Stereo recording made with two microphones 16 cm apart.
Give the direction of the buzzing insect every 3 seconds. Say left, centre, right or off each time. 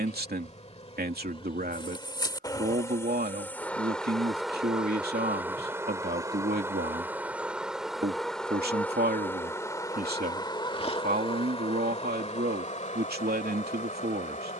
left, centre, centre, left, left.